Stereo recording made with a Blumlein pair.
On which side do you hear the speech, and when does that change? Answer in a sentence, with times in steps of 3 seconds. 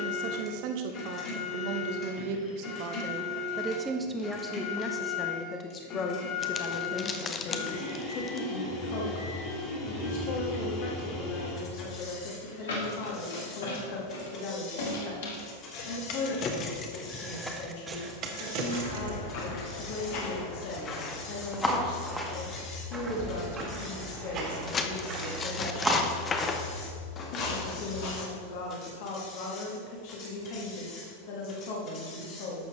You can hear the speech on the right from 0 s, in the centre from 3 s and on the left from 6 s.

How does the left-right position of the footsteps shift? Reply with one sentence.
You can hear the footsteps go right and come back.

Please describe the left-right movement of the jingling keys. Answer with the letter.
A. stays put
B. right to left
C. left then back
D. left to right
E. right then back
C.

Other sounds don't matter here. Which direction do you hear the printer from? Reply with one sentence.
You can hear the printer on the left.